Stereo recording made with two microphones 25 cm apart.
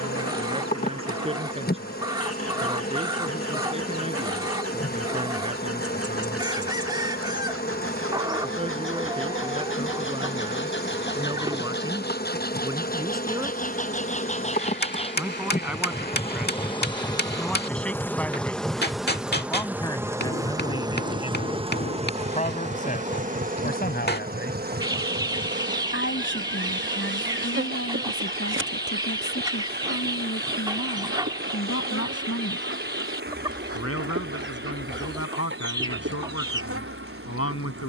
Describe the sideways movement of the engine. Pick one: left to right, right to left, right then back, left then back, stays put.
left to right.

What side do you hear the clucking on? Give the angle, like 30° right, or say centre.
20° right.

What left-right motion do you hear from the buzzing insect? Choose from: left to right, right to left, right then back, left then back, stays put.
left to right.